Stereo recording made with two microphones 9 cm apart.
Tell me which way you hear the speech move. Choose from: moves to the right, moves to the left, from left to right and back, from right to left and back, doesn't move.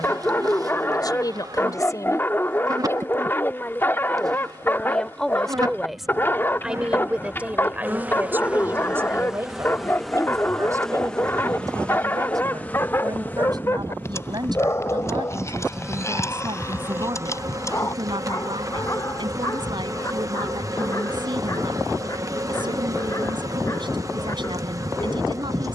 moves to the right.